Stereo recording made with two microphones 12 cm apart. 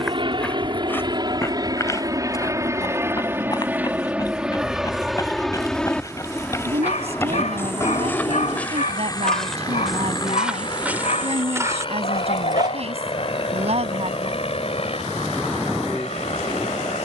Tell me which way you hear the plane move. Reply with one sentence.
You can hear the plane move from right to left.